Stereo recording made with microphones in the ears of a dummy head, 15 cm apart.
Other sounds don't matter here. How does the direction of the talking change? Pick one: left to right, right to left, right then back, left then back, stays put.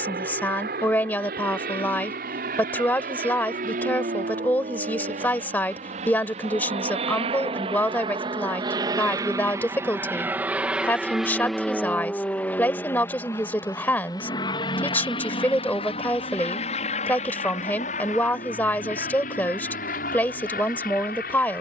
stays put.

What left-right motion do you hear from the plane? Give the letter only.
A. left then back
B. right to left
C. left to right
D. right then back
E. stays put
B.